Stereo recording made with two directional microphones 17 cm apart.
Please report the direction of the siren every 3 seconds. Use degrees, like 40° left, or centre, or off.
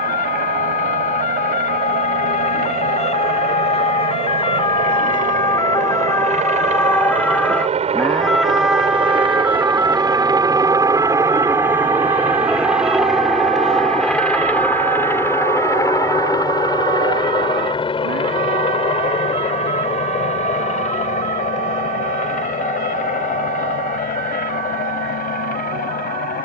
50° left, 30° left, 10° left, 20° right, 40° right, 50° right, 60° right, 60° right, 70° right.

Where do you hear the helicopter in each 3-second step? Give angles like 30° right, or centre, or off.
60° right, 50° right, 40° right, 20° right, centre, 20° left, 40° left, 50° left, 50° left.